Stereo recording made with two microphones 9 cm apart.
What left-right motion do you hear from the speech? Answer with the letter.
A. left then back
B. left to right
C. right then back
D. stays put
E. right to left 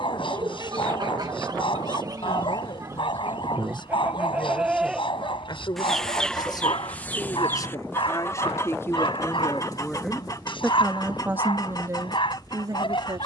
B.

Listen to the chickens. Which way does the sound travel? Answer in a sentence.
You can hear the chickens move from right to left.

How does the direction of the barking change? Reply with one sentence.
You can hear the barking stay put.